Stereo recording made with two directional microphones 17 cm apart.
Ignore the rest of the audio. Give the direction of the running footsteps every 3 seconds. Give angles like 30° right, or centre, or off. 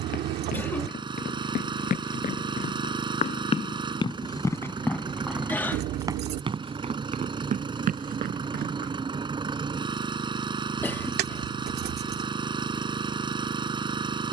50° left, 20° left, 50° right, off, off.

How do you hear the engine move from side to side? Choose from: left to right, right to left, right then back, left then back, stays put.
stays put.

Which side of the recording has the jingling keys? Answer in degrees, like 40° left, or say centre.
70° right.